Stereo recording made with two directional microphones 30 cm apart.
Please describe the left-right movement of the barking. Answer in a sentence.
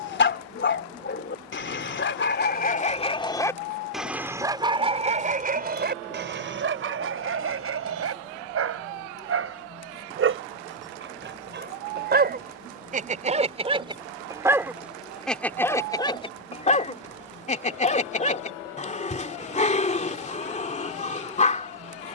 In this clip you hear the barking go right and come back.